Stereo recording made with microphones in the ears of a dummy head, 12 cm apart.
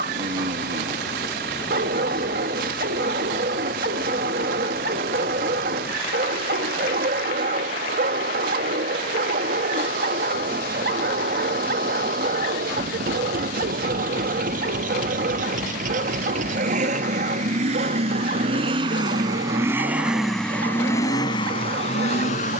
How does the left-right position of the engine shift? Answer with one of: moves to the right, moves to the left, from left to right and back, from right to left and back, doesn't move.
moves to the left.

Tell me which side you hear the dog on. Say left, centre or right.
right.